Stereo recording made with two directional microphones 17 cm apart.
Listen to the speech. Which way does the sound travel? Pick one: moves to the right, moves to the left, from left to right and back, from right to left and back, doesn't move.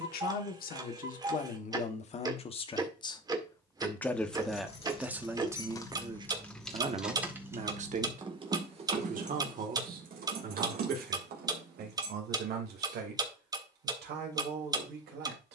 moves to the right.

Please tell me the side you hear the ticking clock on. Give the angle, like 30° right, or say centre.
20° right.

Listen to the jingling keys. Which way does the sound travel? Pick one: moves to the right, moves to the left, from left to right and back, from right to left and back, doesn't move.
moves to the right.